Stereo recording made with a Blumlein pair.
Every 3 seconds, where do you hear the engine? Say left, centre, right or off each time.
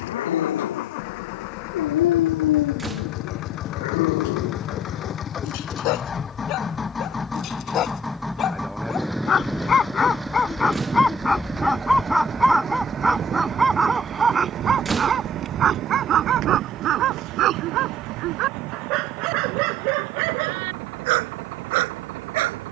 left, left, centre, centre, right, right, right, right.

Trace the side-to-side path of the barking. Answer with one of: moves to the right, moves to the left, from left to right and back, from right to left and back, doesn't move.
moves to the right.